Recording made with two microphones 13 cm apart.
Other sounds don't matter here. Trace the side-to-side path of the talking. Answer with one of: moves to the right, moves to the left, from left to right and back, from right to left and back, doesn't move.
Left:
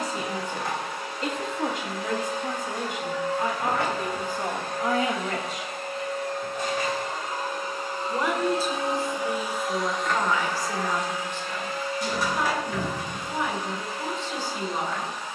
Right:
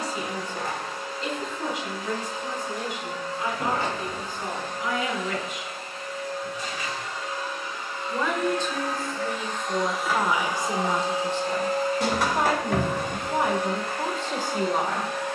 moves to the right.